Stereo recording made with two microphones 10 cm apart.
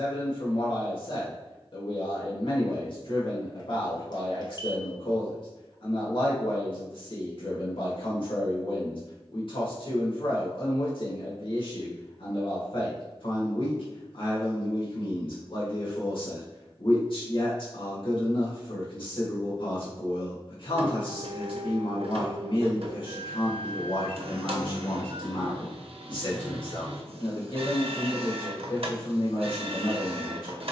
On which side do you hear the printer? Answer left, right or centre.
right.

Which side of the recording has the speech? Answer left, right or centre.
left.